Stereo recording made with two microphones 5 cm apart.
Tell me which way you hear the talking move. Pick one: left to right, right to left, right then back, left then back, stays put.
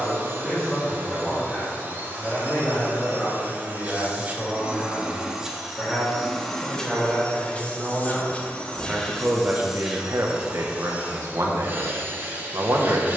left to right.